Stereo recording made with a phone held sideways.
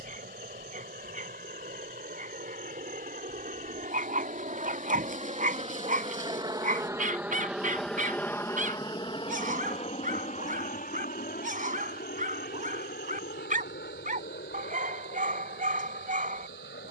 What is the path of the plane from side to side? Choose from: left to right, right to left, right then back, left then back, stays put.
right to left.